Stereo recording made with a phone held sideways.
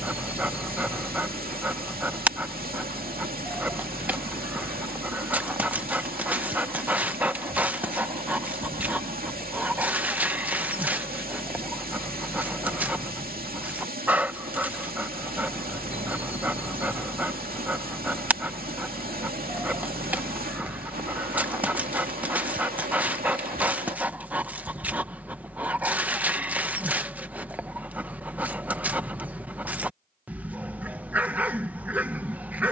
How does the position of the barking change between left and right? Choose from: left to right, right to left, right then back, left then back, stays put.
stays put.